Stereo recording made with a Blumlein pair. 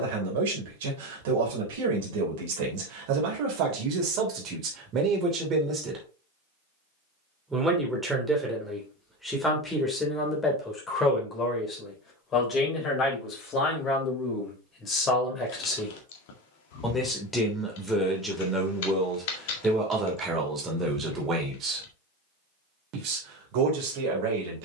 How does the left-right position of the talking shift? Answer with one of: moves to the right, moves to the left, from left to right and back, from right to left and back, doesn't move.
from right to left and back.